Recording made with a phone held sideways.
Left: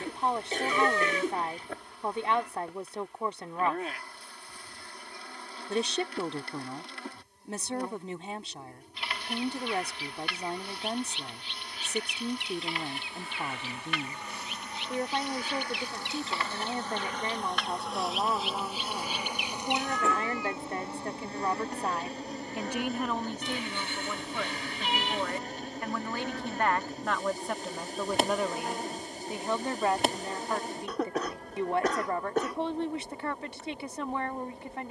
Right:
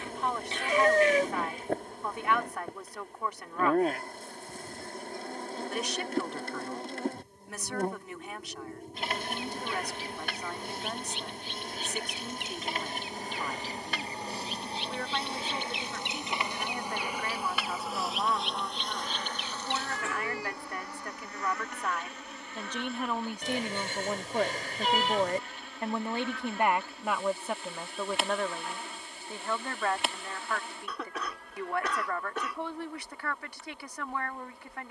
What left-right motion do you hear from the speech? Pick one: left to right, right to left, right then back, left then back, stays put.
right then back.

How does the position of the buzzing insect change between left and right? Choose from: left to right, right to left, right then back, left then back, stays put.
right to left.